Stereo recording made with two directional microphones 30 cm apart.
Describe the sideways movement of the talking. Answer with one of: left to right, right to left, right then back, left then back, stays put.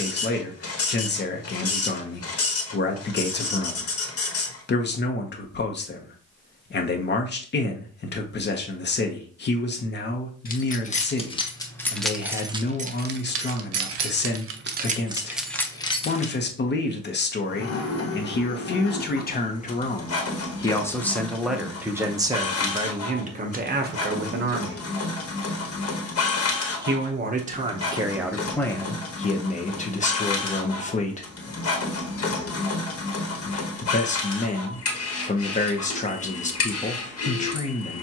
right then back.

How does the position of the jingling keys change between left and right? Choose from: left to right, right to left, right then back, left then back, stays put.
right then back.